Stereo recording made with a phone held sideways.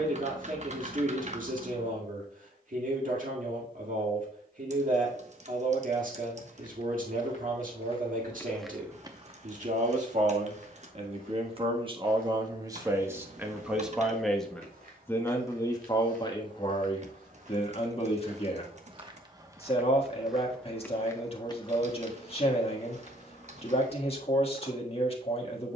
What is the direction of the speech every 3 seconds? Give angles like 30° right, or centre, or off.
60° right, 60° right, 60° right, 50° right, 10° right, 30° left, 40° left, 40° left, 40° left.